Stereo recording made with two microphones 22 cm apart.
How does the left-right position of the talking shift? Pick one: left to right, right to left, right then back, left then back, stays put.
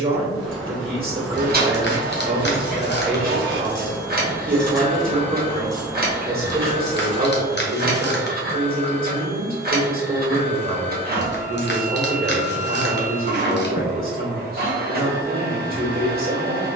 stays put.